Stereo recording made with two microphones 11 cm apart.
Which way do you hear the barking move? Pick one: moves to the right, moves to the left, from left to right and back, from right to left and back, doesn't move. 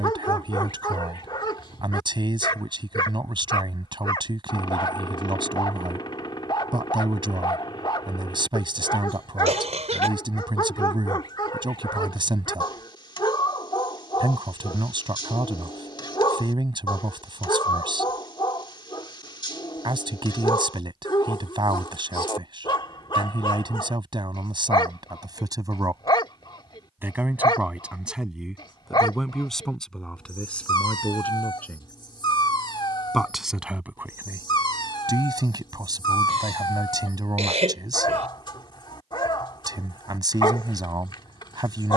doesn't move.